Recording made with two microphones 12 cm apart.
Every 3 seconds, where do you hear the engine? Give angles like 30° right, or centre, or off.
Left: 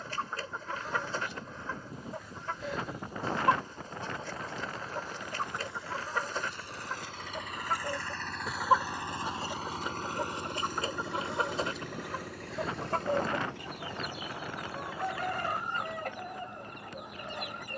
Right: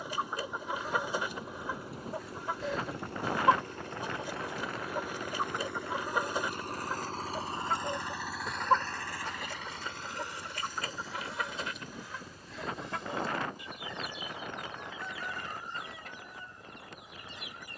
80° right, 70° right, 30° right, 50° left, 70° left, 80° left.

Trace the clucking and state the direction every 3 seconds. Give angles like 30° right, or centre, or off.
10° right, 10° right, 10° right, 20° left, 50° left, 60° left.